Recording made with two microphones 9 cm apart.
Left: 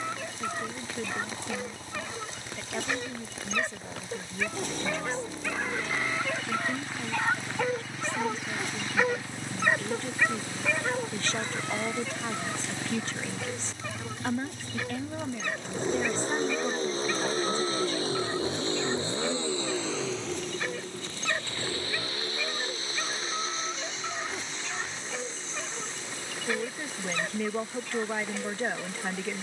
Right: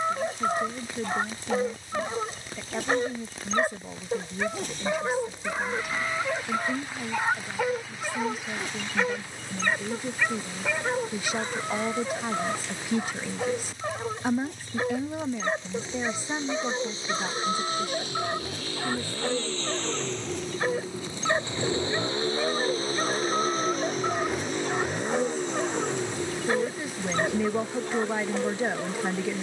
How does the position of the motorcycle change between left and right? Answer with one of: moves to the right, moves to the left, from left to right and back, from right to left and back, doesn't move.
moves to the right.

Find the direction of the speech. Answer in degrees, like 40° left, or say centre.
10° right.